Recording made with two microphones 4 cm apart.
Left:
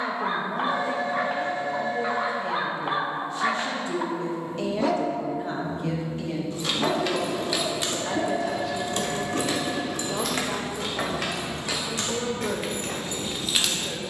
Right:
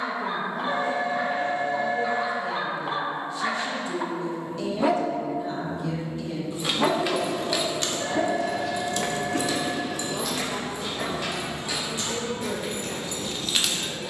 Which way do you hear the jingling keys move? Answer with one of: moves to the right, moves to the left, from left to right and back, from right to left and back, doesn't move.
from right to left and back.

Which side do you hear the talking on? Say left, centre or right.
left.